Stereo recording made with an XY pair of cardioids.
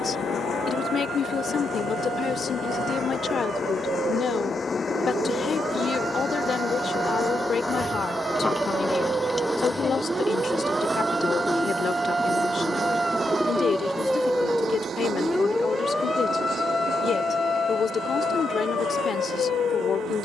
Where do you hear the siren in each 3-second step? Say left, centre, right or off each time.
right, right, right, right, centre, left, left.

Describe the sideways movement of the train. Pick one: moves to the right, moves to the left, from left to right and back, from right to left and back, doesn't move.
moves to the right.